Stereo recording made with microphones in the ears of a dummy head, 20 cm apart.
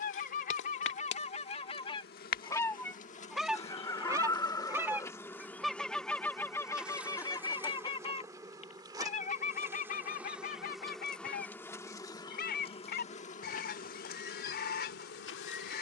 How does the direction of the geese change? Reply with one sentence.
You can hear the geese move from left to right and back again.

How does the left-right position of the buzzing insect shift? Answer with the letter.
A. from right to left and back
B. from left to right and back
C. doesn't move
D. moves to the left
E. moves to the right
B.